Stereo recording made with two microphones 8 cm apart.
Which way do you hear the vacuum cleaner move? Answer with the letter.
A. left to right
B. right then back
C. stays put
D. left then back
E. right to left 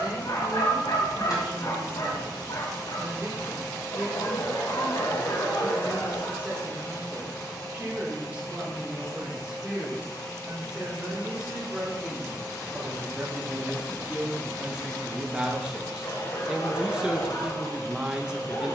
C.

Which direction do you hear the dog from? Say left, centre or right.
left.